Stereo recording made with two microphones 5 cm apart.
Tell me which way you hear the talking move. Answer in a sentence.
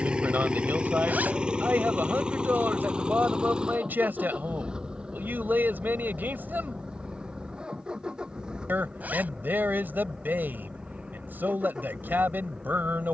In this clip you hear the talking stay put.